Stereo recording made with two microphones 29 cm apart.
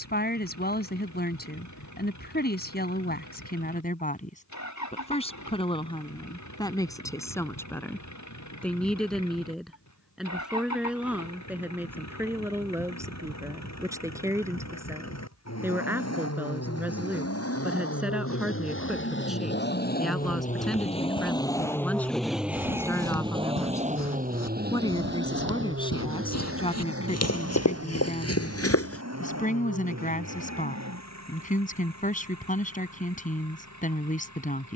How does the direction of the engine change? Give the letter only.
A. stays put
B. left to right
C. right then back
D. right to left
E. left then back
B.